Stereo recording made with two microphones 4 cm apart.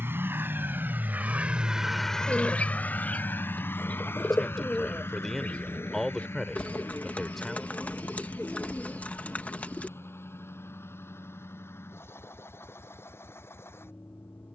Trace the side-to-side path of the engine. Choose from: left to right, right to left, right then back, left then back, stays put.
right to left.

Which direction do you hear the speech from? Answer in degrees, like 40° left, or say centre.
10° left.